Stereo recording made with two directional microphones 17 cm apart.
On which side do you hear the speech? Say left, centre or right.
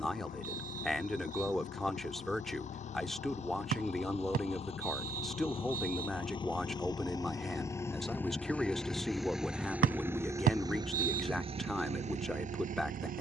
centre.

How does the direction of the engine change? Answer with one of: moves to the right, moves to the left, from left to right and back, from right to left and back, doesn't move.
moves to the right.